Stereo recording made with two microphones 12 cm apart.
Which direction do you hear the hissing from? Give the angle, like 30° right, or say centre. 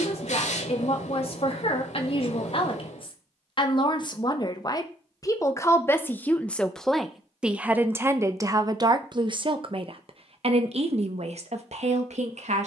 70° left.